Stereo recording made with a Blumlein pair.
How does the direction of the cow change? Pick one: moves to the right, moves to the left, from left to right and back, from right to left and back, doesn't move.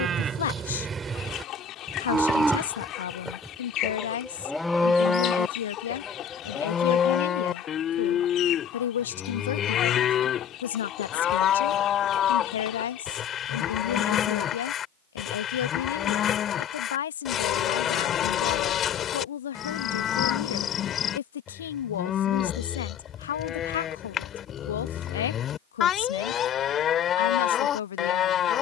moves to the left.